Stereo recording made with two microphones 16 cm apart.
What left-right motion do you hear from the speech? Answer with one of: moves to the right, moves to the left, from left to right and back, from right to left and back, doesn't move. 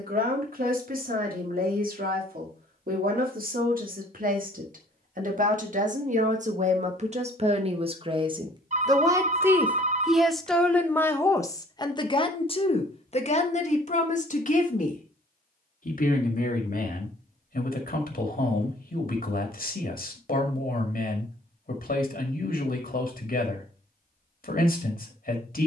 moves to the left.